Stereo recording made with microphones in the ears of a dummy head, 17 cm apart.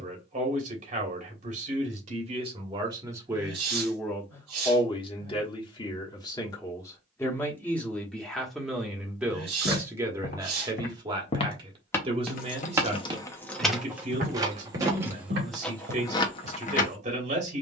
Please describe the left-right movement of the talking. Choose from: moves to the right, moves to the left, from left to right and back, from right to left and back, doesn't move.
from right to left and back.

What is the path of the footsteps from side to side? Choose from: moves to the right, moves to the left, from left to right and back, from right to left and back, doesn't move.
moves to the right.